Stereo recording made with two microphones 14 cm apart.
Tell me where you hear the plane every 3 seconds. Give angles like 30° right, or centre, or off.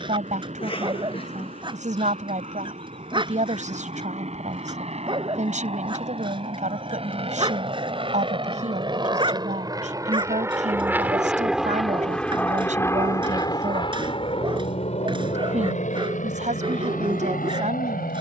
60° right, 60° right, 50° right, 20° right, 30° left, 60° left.